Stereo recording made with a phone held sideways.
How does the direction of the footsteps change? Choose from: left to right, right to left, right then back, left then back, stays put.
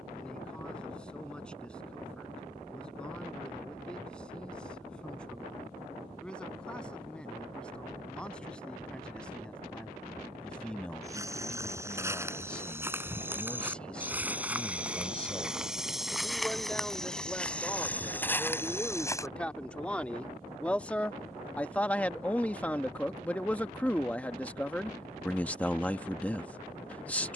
right to left.